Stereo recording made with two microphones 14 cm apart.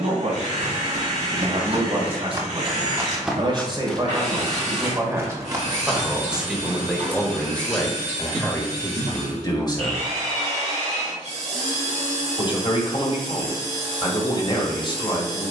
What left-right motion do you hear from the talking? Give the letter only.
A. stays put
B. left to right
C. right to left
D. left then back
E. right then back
C.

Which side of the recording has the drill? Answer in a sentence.
In this clip you hear the drill on the right.